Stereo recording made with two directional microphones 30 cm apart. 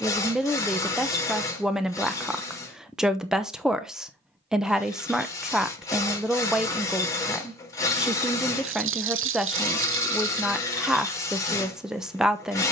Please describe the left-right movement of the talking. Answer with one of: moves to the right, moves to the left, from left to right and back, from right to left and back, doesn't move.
doesn't move.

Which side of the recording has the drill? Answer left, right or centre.
centre.